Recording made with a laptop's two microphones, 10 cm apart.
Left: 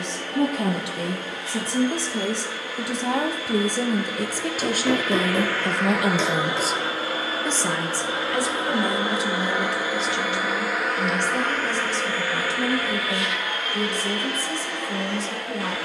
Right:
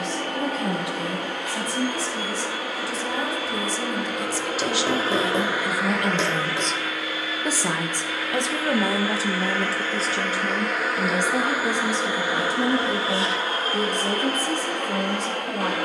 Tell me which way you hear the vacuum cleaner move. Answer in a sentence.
You can hear the vacuum cleaner go left and come back.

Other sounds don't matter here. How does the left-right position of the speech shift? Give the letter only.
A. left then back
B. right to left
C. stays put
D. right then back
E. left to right
E.